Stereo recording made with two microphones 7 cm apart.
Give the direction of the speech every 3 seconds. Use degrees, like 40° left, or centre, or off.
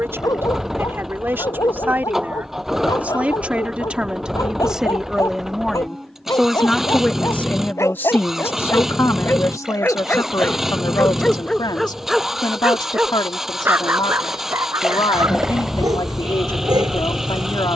30° right, 10° right, 20° left, 60° left, 70° left, 70° left.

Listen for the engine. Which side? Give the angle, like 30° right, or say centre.
centre.